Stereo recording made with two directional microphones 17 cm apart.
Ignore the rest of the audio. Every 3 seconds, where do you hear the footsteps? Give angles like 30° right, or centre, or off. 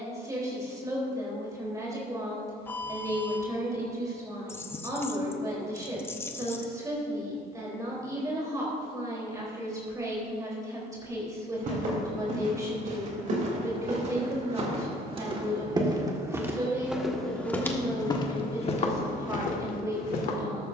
off, off, off, 50° right, 40° right, 10° right, 40° left.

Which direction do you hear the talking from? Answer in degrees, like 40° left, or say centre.
20° right.